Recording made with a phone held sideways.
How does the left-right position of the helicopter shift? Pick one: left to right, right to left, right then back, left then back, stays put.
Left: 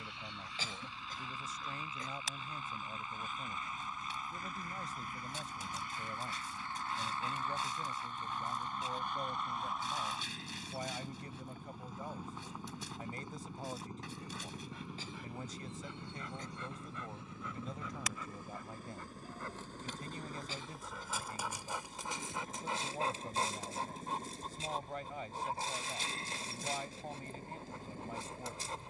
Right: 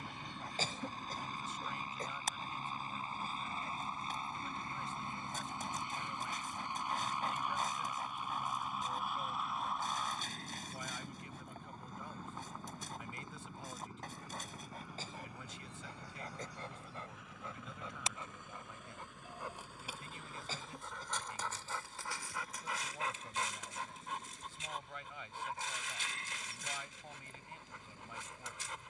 right to left.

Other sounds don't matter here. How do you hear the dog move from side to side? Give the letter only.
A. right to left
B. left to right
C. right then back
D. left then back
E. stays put
A.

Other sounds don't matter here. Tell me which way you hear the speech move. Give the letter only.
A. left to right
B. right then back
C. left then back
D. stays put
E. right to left
D.